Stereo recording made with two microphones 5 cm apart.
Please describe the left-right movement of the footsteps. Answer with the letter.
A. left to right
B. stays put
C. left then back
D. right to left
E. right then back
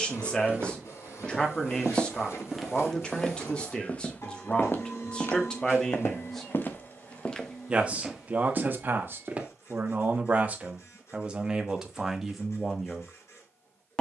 C.